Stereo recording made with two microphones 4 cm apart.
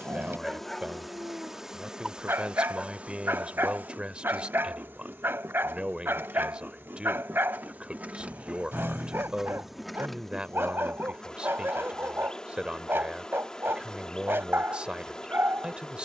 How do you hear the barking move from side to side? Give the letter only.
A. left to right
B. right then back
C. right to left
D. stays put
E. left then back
D.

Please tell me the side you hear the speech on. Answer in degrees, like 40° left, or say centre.
30° right.